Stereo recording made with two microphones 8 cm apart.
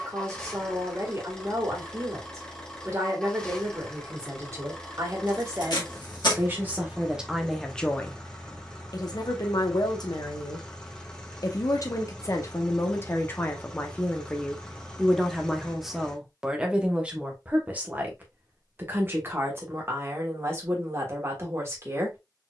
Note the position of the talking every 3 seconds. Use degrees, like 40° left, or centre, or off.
40° right, 40° right, centre, 60° left, 30° left, 10° right, 30° right, 30° right.